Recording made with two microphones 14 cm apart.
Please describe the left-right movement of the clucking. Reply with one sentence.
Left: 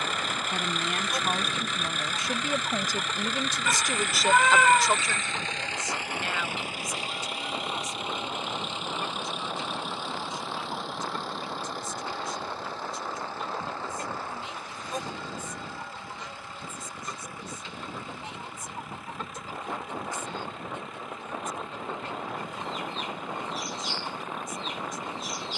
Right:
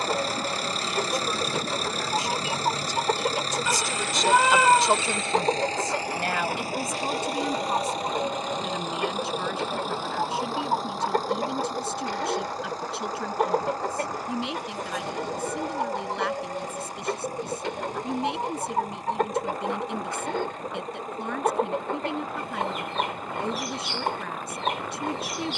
In this clip you hear the clucking stay put.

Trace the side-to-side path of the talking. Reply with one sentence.
In this clip you hear the talking move from left to right.